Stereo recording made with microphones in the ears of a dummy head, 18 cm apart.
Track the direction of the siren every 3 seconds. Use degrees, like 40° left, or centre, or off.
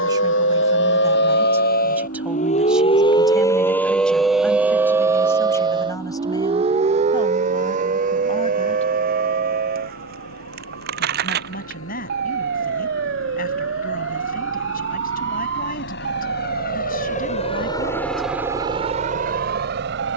50° left, centre, 40° right, 50° right, 50° right, 60° right, 60° right.